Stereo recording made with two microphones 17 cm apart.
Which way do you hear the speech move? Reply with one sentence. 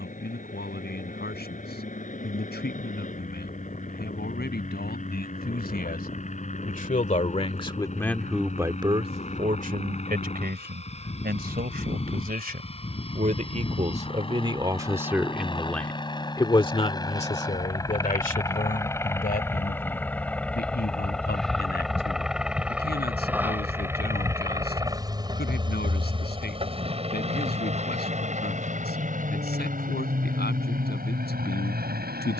You can hear the speech move from left to right and back again.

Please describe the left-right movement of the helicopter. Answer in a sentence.
In this clip you hear the helicopter go from the left side to the right.